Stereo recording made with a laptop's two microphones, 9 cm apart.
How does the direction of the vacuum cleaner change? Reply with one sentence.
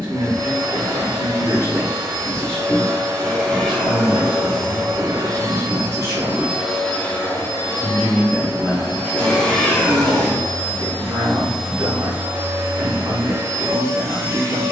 In this clip you hear the vacuum cleaner move from right to left and back again.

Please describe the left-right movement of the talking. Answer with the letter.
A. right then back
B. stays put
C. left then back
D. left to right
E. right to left
C.